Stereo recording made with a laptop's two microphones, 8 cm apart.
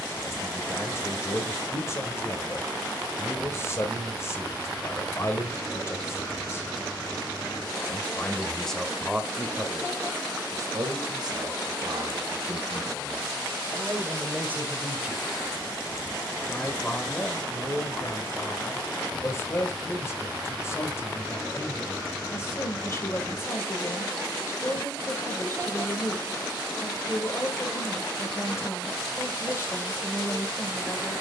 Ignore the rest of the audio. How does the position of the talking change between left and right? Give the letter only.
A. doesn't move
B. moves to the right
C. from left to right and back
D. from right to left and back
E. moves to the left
C.